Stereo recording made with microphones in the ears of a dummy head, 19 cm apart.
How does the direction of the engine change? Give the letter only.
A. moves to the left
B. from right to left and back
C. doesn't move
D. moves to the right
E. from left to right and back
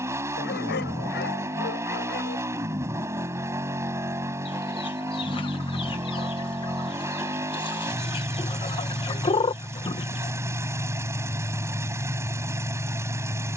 C.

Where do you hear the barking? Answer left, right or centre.
left.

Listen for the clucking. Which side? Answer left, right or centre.
left.